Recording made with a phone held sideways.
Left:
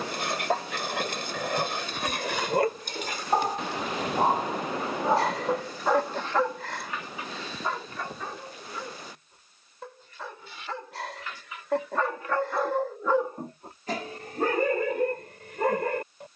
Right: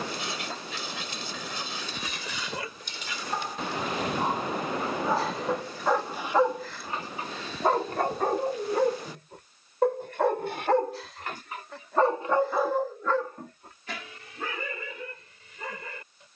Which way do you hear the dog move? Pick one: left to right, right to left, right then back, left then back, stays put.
right then back.